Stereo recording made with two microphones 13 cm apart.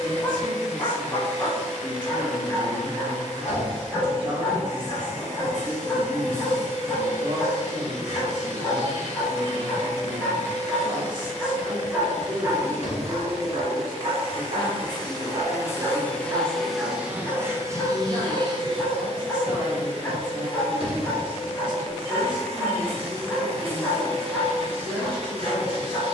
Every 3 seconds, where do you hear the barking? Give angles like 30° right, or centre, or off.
20° left, 20° left, 20° left, 10° left, 30° right, 10° right, 10° left, 10° left, 10° left.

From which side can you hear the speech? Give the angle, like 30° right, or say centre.
40° right.